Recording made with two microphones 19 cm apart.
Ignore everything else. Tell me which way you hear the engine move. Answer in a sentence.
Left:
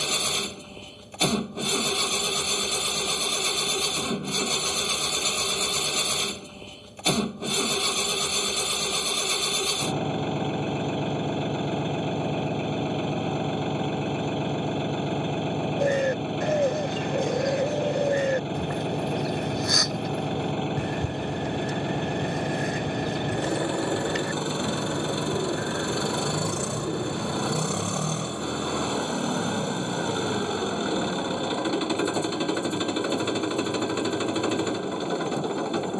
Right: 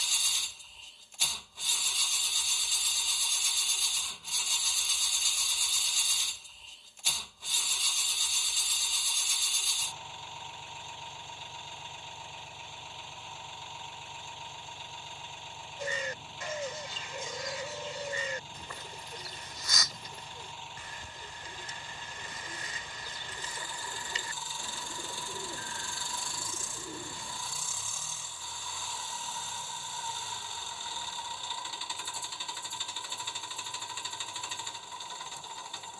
In this clip you hear the engine stay put.